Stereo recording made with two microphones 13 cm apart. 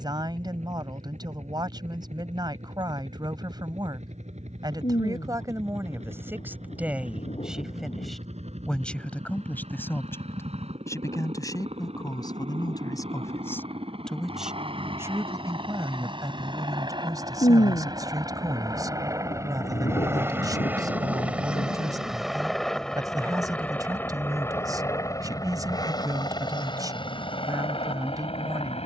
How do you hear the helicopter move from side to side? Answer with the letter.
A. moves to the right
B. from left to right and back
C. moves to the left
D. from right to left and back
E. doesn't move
C.